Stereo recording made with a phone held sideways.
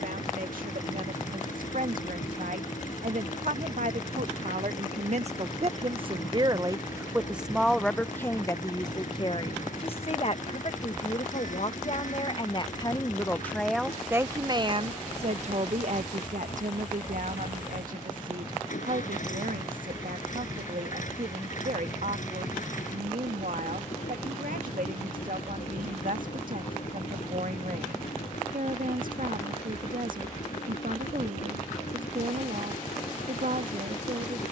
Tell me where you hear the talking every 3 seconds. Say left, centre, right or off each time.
right, right, centre, left, centre, right, right, right, right, right, right, right.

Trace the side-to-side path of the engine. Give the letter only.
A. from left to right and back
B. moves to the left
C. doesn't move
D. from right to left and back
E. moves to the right
C.